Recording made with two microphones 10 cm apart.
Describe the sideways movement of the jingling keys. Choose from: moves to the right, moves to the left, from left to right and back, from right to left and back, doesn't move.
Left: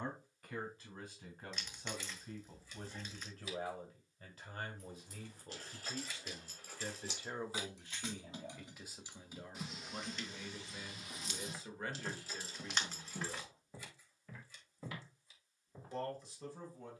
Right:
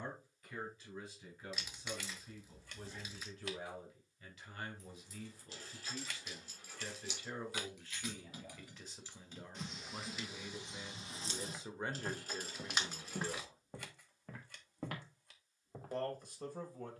moves to the right.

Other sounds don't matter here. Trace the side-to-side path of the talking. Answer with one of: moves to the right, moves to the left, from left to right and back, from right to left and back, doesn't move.
moves to the right.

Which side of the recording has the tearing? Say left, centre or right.
centre.